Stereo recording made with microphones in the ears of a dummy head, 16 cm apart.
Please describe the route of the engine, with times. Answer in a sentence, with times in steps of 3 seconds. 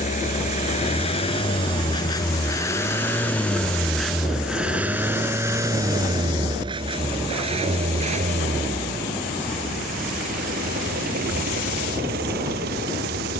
In this clip you hear the engine on the left from 0 s, in the centre from 3 s and on the right from 6 s.